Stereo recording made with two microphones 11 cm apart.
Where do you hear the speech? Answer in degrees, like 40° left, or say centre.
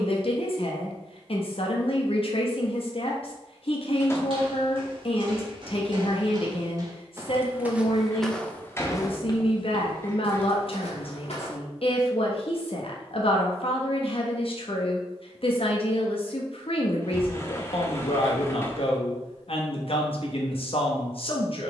60° left.